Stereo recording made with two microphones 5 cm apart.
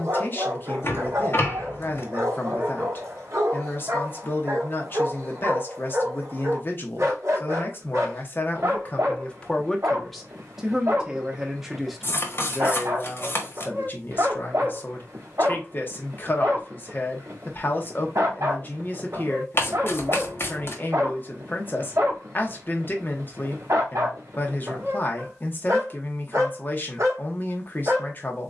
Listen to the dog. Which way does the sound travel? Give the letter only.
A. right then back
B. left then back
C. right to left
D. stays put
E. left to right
D.